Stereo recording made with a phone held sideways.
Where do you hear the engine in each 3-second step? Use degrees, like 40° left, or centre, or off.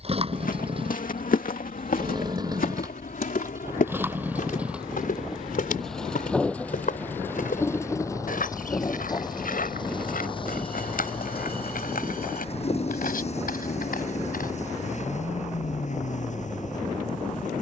30° right, 10° right, 20° left, 40° left, 50° left, 60° left.